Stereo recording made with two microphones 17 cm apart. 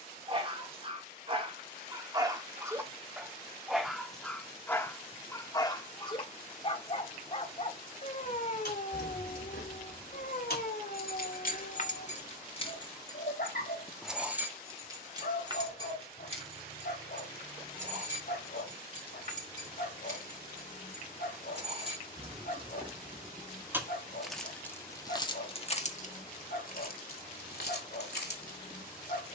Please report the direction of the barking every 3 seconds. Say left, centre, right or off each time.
right, centre, left, left, left, left, left, left, left, left.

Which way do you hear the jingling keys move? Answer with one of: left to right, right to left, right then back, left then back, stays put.
right then back.